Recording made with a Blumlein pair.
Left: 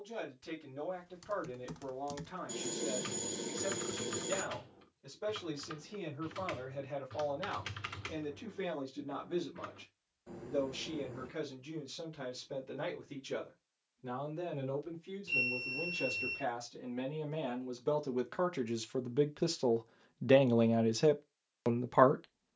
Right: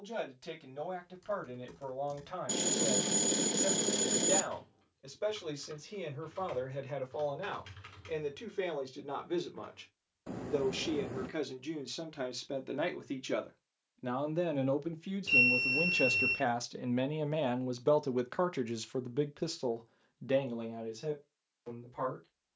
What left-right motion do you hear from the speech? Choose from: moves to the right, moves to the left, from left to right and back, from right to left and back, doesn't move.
moves to the left.